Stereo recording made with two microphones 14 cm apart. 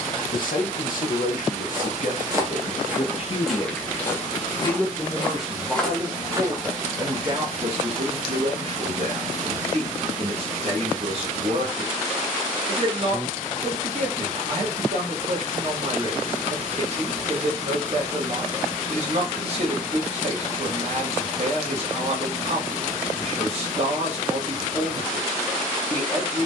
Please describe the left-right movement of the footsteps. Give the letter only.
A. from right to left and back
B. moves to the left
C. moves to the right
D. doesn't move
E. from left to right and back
A.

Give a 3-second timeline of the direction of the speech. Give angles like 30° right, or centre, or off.
60° left, 20° left, 40° right, 50° right, 50° right, 50° right, 50° right, 50° right, 50° right.